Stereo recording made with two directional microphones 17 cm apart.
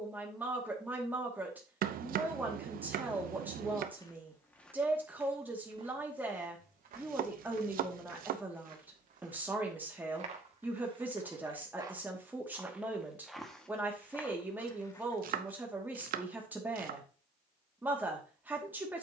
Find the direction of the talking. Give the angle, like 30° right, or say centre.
10° right.